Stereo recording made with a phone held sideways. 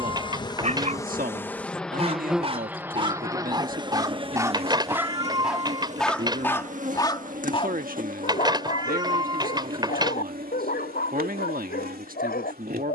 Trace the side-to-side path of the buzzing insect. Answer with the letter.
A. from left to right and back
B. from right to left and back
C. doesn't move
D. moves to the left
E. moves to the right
E.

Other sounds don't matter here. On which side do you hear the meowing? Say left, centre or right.
right.